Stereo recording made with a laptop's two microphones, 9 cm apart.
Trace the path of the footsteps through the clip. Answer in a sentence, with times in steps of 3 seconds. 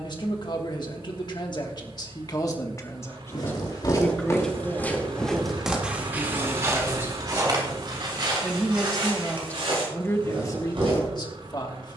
You can hear the footsteps not at all from 0 s, on the left from 3 s and on the right from 6 s.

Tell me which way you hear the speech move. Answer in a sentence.
In this clip you hear the speech move from left to right and back again.